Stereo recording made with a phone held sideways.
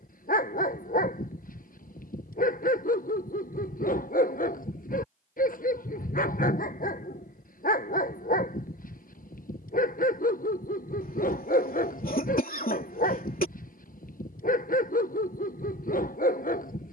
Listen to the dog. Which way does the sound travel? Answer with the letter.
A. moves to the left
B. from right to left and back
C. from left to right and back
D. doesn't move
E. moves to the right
D.